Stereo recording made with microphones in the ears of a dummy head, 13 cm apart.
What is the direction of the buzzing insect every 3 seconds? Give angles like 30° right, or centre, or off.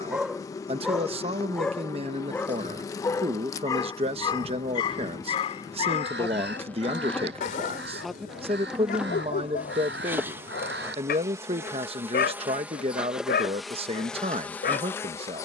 20° left, 20° left, 10° left, 20° right, centre.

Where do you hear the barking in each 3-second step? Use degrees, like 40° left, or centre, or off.
centre, 30° left, 60° left, 70° left, 80° left.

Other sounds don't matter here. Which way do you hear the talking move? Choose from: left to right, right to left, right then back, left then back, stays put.
stays put.